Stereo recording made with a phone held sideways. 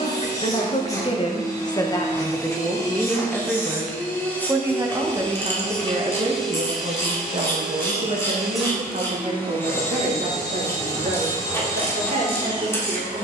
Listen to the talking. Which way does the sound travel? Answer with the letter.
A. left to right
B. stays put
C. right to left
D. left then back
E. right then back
A.